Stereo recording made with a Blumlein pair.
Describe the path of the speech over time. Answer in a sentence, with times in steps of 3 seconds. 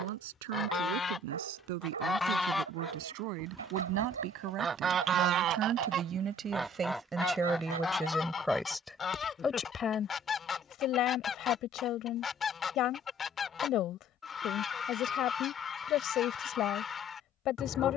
You can hear the speech on the right from 0 s, in the centre from 6 s and on the left from 9 s.